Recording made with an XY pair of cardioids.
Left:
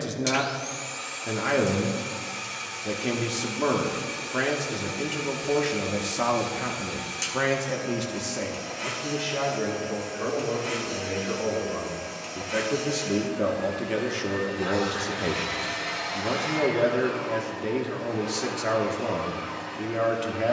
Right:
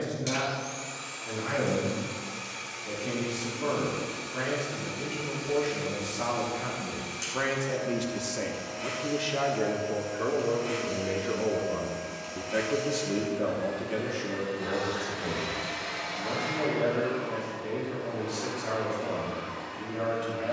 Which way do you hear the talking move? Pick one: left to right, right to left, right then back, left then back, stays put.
right then back.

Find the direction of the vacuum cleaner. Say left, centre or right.
left.